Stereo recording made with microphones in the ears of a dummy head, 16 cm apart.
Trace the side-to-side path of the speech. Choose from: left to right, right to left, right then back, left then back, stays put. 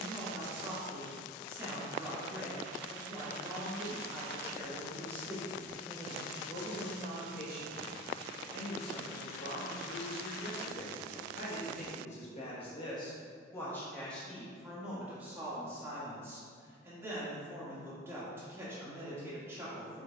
left then back.